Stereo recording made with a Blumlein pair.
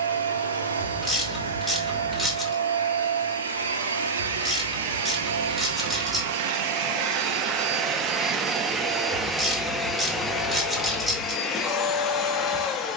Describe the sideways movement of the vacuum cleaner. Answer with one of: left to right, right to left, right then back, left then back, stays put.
right to left.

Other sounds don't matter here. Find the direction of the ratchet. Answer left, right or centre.
centre.